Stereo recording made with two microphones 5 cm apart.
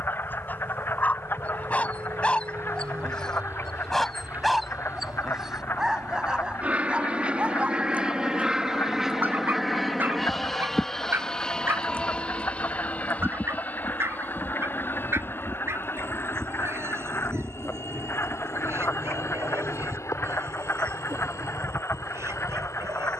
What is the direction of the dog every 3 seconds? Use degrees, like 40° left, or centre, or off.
30° left, centre, 20° right, 40° right, 50° right, 60° right, 60° right, 60° right.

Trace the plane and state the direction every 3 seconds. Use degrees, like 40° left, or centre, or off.
50° right, 40° right, 20° right, centre, 30° left, 50° left, 60° left, 70° left.